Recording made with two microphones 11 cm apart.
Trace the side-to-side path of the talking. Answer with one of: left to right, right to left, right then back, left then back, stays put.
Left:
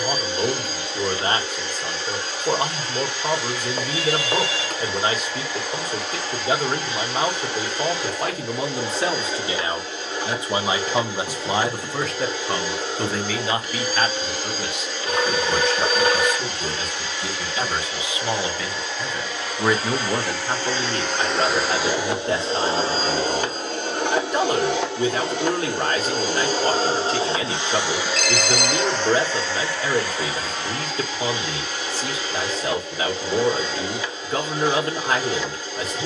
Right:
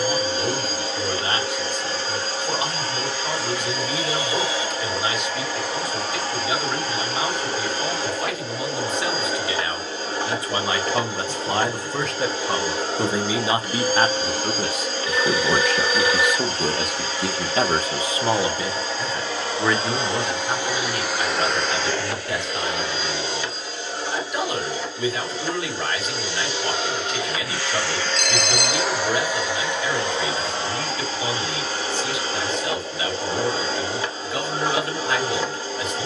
right then back.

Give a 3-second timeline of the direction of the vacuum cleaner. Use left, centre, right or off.
right, right, right, right, right, right, right, left, left, centre, right, right.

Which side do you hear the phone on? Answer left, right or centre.
left.